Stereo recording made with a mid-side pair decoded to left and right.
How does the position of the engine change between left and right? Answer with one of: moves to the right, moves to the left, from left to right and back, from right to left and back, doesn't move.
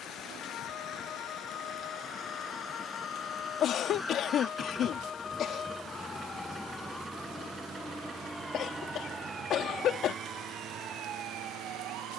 moves to the right.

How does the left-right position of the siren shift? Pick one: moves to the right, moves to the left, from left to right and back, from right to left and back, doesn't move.
moves to the right.